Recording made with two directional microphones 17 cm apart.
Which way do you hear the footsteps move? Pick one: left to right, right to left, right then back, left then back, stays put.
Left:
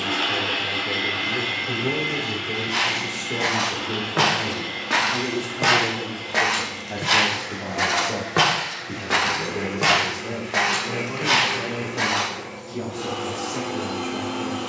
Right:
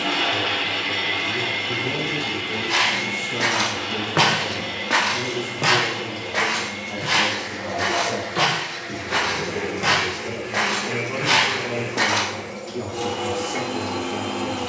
left then back.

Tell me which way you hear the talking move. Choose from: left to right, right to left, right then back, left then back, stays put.
left to right.